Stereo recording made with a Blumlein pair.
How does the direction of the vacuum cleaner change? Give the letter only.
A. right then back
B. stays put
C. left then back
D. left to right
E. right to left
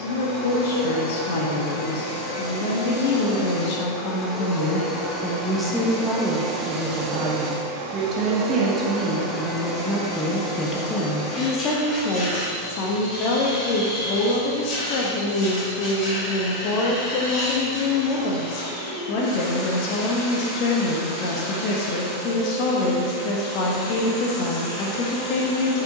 A.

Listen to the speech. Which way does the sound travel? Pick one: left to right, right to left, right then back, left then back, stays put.
right then back.